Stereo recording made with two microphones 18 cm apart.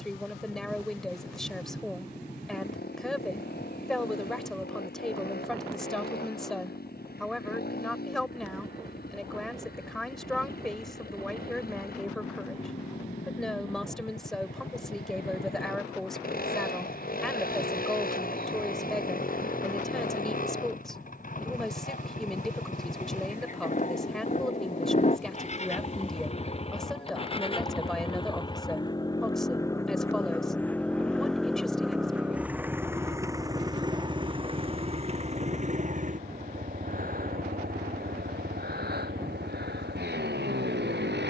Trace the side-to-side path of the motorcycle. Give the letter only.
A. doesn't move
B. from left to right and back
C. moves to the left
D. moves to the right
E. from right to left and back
D.